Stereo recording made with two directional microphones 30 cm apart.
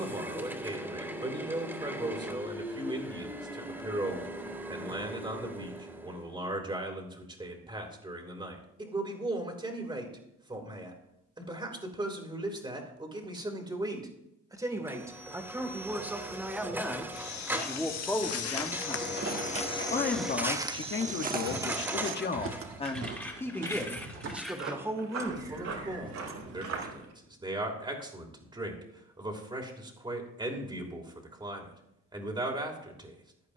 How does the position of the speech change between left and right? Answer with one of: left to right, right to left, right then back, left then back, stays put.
left then back.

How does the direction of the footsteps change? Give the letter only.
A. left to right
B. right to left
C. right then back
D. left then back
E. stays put
A.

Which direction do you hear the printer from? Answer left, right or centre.
centre.